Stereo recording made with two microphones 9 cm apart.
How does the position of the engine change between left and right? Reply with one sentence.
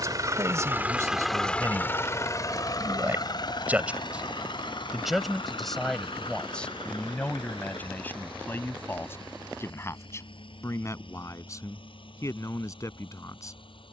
You can hear the engine go from the right side to the left.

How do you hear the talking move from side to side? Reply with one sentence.
You can hear the talking go from the right side to the left.